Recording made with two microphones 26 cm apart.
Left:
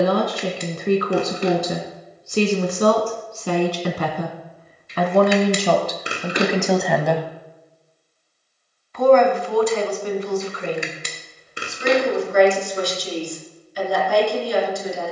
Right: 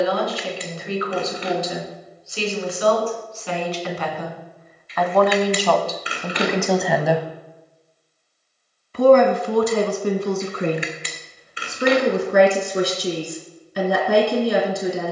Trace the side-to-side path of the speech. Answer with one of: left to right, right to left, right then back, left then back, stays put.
left to right.